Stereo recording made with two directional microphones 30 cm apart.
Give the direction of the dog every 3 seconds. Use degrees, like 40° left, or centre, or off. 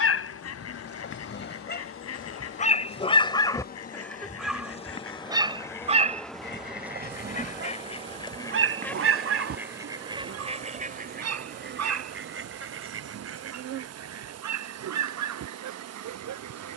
40° left, centre, 40° right, 50° right, 60° right, 70° right.